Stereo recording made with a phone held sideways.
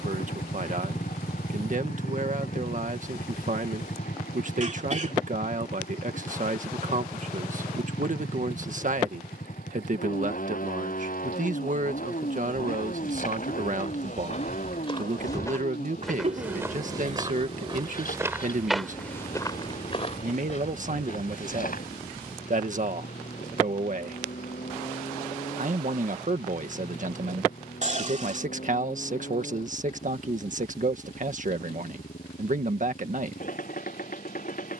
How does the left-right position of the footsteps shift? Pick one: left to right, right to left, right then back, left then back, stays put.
right then back.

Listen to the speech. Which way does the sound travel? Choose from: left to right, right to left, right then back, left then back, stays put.
stays put.